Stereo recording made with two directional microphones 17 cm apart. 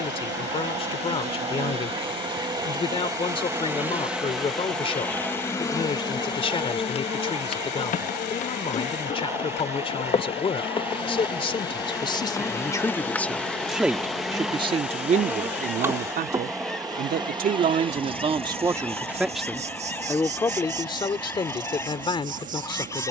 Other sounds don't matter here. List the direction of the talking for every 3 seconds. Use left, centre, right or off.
left, left, left, left, centre, right, centre, left.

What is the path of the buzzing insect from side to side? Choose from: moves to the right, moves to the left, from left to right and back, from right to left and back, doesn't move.
from right to left and back.